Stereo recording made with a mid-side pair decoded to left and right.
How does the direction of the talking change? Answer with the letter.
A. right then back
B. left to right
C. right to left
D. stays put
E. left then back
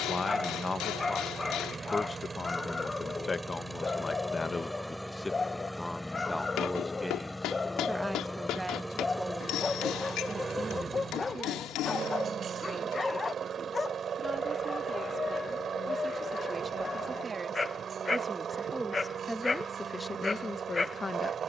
A.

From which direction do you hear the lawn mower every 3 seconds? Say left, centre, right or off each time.
right, centre, centre, right, right, right, right.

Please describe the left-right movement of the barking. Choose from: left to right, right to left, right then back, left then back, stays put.
stays put.